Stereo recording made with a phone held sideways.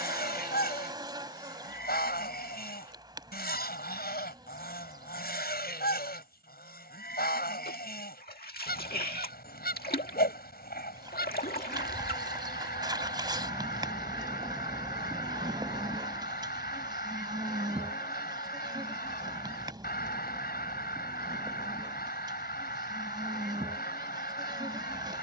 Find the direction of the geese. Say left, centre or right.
left.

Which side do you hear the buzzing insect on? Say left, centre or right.
right.